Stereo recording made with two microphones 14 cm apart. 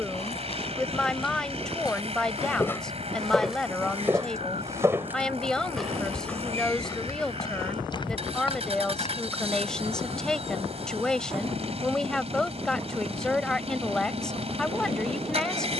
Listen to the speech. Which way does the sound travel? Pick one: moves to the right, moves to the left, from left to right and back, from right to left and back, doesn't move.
doesn't move.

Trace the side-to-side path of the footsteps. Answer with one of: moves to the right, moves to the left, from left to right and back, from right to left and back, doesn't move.
from left to right and back.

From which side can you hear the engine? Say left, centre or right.
right.